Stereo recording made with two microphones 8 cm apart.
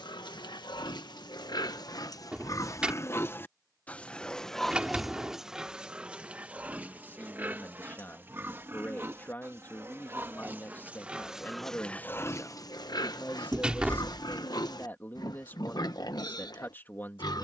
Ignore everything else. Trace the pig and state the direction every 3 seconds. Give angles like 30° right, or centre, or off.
60° left, 10° left, 20° right, 20° right, 60° left, 60° left.